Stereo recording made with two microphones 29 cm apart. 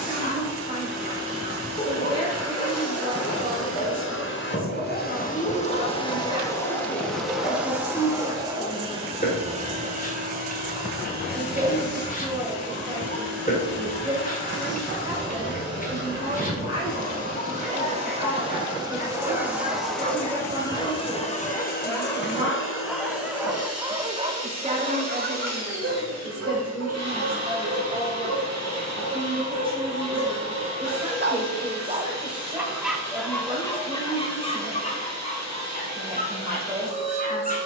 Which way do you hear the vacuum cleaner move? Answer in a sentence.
You can hear the vacuum cleaner go right and come back.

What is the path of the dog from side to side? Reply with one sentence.
In this clip you hear the dog move from left to right and back again.